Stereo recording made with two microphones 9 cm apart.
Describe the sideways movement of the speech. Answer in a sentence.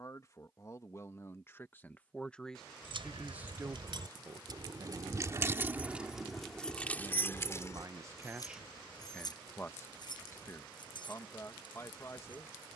In this clip you hear the speech go right and come back.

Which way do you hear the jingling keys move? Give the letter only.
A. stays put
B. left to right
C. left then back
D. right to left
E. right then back
D.